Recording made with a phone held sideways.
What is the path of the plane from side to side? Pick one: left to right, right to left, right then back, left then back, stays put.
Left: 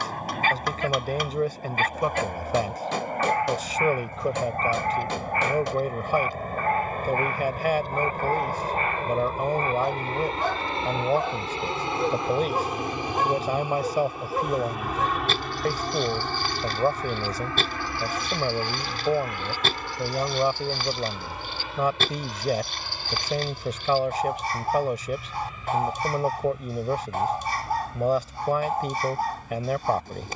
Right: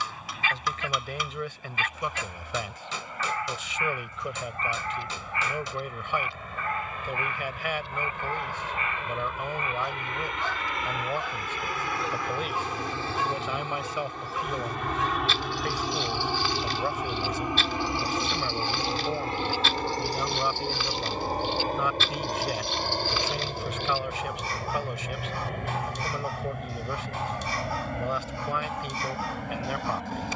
left to right.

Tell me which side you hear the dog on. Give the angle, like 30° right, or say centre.
50° left.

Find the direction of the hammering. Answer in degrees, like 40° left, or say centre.
60° left.